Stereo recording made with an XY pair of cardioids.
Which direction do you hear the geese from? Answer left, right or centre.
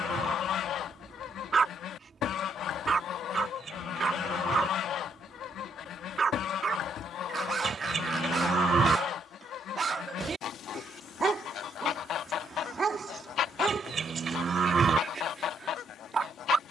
left.